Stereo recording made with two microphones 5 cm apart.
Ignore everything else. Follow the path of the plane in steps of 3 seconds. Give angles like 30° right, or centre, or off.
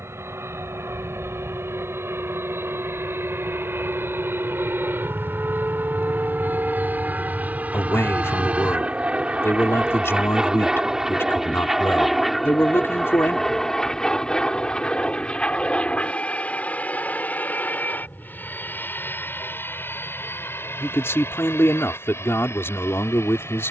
60° right, 50° right, 30° right, 10° right, 10° left, 20° left, 40° left, 50° left.